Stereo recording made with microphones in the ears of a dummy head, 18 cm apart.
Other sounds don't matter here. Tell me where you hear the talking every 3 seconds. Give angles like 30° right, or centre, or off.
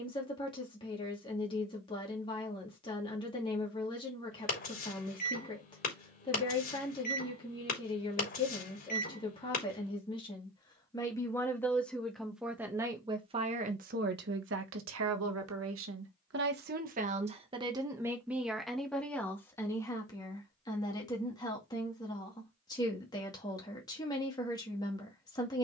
20° left, 20° left, 20° left, 20° left, 30° right, 50° right, 10° left, 20° left, 20° left.